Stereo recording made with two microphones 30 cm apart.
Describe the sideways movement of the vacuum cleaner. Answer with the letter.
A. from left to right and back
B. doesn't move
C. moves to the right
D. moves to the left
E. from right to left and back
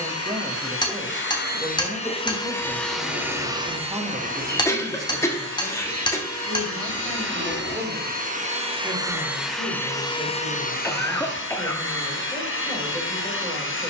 A.